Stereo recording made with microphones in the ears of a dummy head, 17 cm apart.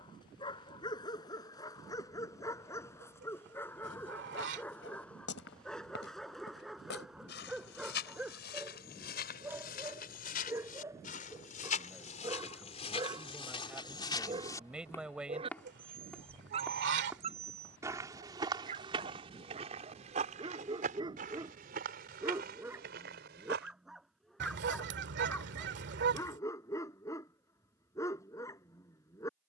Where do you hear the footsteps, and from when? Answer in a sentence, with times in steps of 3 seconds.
In this clip you hear the footsteps not at all from 0 s, on the left from 3 s, in the centre from 15 s, on the right from 18 s and not at all from 24 s.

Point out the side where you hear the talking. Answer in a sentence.
In this clip you hear the talking in the centre.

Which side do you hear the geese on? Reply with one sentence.
In this clip you hear the geese on the right.